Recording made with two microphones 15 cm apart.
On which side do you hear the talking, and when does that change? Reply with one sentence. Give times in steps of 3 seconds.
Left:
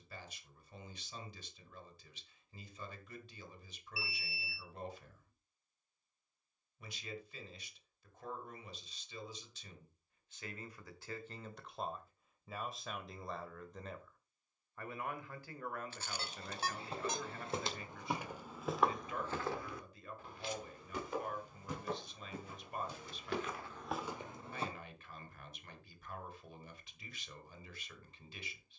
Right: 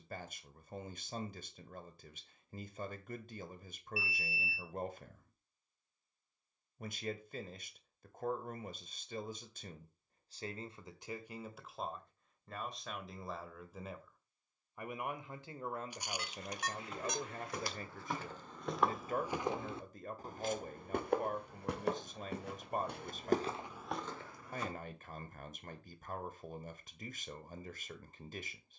In this clip you hear the talking on the right from 0 s, in the centre from 12 s and on the right from 15 s.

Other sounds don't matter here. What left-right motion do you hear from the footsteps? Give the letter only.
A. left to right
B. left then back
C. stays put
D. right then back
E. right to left
D.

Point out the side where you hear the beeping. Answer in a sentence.
You can hear the beeping on the left.